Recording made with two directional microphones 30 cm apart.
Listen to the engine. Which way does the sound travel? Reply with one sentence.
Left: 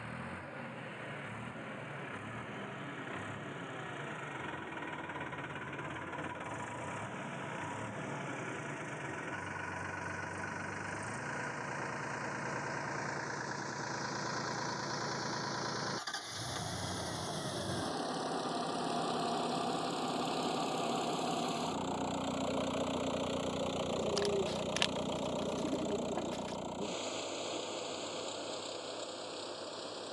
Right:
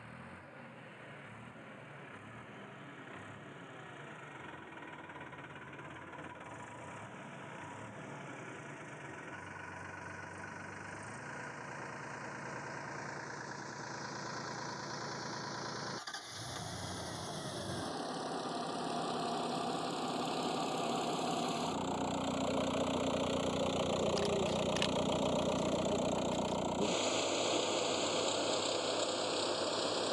In this clip you hear the engine go from the left side to the right.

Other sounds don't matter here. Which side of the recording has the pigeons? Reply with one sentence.
You can hear the pigeons on the left.